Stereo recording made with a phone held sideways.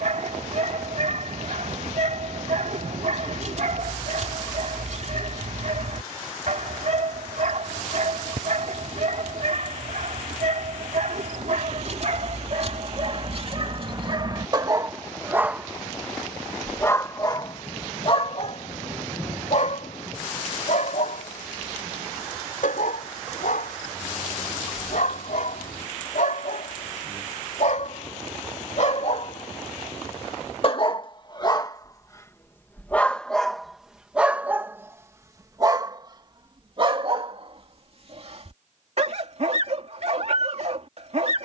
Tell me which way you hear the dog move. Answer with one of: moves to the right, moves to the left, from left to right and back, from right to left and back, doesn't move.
from right to left and back.